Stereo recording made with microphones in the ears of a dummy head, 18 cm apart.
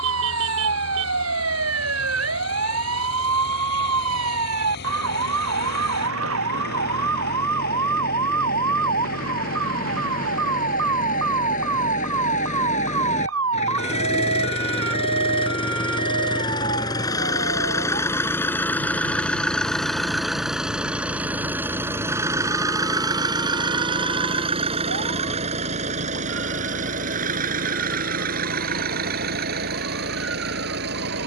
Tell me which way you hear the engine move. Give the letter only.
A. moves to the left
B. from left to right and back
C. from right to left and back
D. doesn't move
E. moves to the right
E.